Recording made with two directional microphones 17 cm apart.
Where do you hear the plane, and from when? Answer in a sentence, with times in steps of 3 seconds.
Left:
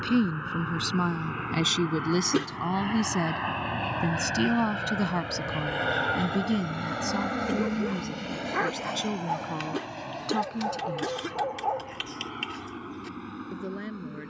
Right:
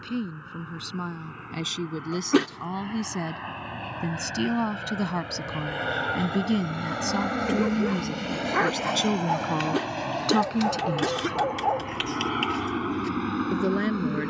You can hear the plane on the left from 0 s, in the centre from 6 s and on the right from 9 s.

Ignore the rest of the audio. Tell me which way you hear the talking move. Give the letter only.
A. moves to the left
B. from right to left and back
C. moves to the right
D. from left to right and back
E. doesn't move
C.